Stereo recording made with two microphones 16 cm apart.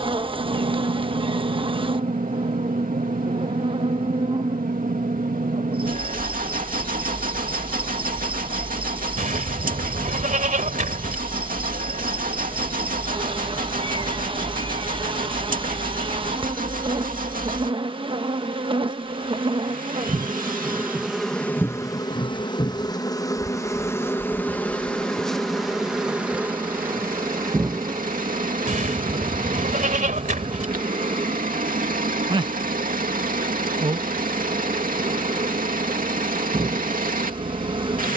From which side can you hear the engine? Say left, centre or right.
right.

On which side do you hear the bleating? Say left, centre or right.
right.